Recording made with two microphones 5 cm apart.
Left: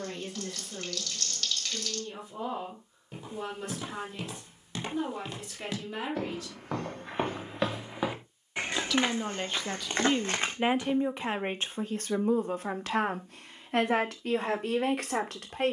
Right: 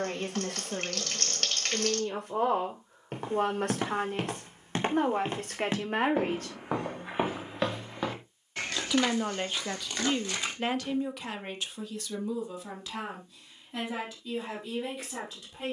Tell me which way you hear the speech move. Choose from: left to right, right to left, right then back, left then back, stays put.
right to left.